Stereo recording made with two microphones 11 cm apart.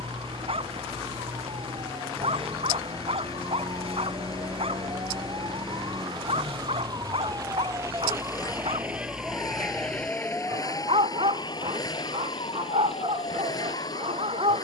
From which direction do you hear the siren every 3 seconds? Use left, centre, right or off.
right, right, right, left, left.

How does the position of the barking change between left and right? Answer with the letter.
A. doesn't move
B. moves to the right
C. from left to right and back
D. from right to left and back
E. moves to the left
A.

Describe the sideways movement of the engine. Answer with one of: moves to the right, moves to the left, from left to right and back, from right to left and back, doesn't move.
doesn't move.